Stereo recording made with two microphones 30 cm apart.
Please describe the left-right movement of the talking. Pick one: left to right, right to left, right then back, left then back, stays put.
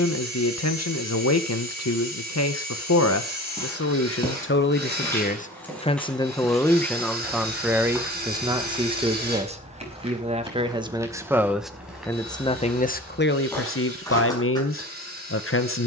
right then back.